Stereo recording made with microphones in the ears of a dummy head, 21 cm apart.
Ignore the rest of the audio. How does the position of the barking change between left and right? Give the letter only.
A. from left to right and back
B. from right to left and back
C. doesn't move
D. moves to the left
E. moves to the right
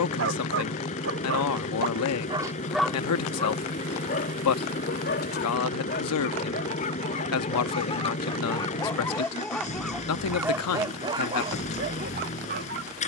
B.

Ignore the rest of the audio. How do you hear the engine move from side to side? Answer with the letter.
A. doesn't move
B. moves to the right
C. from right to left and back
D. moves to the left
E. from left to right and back
A.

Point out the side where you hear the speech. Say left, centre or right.
left.